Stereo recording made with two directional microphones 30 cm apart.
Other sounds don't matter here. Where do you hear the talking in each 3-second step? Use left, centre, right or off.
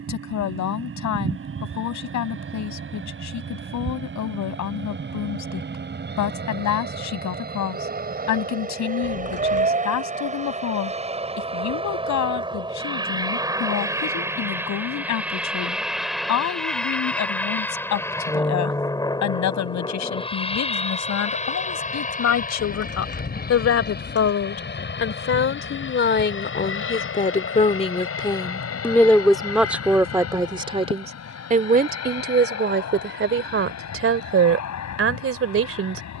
left, left, left, left, left, left, left, left, left, centre, right, right.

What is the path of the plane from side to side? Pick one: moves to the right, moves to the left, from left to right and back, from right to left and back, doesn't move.
moves to the left.